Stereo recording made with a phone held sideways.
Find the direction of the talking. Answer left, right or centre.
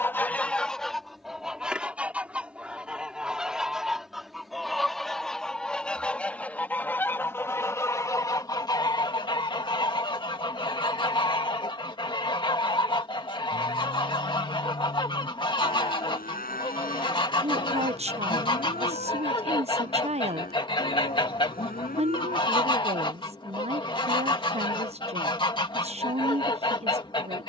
right.